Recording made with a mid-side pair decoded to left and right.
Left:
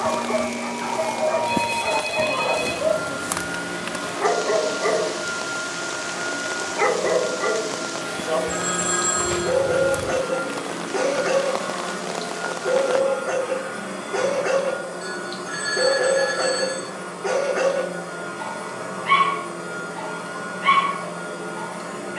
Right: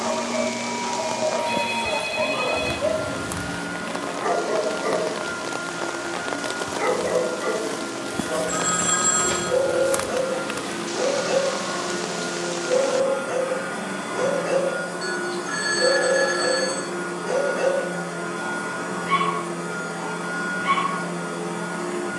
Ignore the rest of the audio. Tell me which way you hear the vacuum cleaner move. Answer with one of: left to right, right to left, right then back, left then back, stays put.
left to right.